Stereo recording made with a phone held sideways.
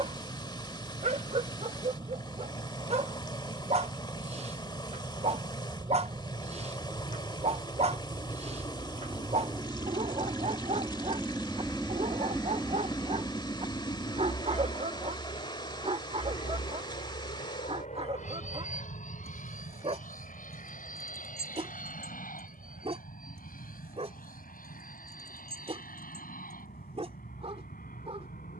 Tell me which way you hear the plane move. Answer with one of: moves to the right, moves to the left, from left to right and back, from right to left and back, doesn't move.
moves to the left.